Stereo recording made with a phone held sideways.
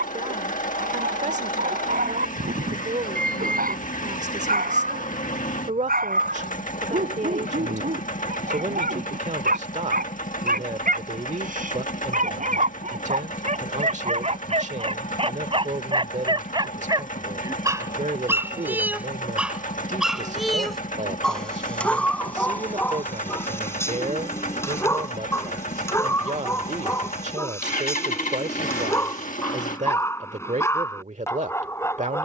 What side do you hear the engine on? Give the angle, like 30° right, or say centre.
50° left.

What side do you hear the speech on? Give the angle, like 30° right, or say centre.
50° right.